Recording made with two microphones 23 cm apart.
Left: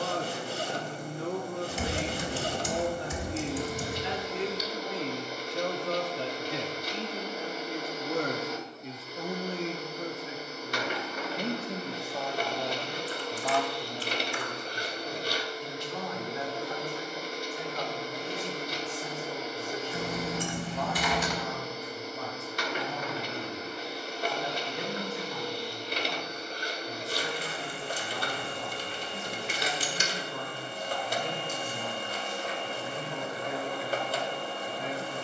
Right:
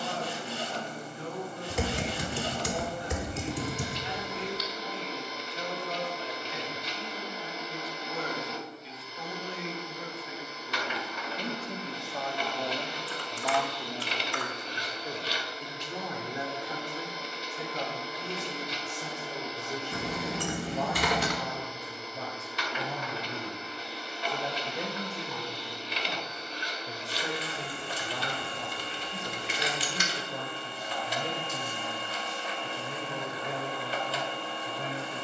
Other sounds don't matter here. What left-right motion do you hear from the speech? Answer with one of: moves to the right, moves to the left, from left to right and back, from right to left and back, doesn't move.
moves to the right.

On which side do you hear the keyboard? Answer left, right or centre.
right.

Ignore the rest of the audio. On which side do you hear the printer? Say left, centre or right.
left.